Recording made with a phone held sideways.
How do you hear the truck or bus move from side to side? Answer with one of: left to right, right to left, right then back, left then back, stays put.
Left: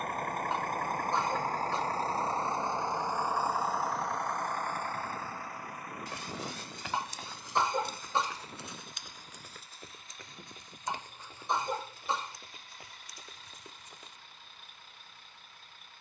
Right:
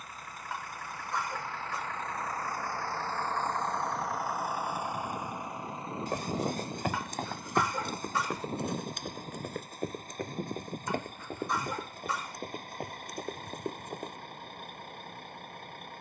left to right.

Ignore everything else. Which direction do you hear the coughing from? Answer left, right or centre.
left.